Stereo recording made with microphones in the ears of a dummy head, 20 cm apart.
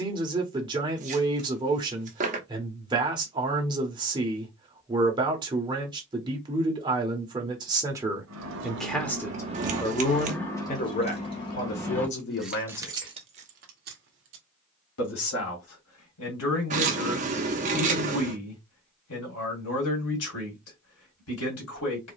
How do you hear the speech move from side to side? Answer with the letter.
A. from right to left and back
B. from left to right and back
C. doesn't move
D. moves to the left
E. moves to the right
D.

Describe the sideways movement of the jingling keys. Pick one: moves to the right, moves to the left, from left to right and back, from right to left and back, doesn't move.
from right to left and back.